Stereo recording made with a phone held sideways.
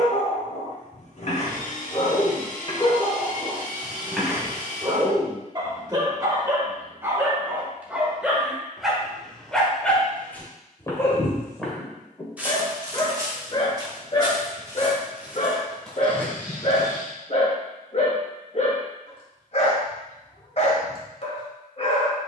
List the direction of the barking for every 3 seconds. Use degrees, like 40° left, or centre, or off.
50° left, 10° right, 10° right, 10° left, 30° left, 50° left, 50° left, 50° left.